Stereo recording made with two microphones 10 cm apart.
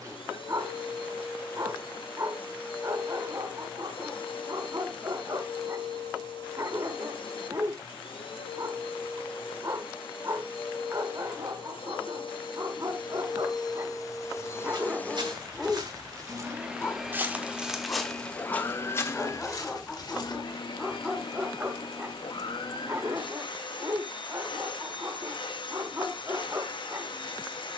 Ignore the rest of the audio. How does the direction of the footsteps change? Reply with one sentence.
In this clip you hear the footsteps move to the left.